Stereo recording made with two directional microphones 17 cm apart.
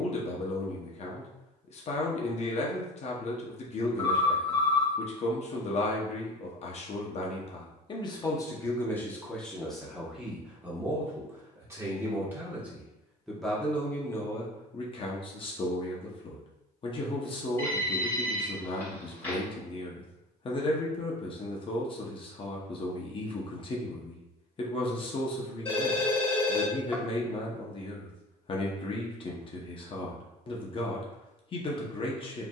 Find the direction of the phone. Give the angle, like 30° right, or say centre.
10° left.